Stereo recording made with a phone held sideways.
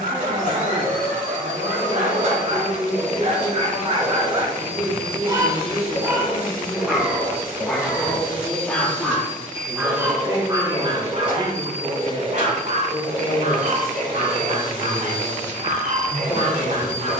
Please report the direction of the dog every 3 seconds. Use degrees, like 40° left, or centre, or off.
60° right, 30° right, centre, 20° right, 50° right, 50° right.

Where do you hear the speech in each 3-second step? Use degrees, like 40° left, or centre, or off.
40° right, 30° right, 10° right, 20° left, 40° left, 40° left.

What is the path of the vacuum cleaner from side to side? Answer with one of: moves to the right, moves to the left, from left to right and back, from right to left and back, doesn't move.
doesn't move.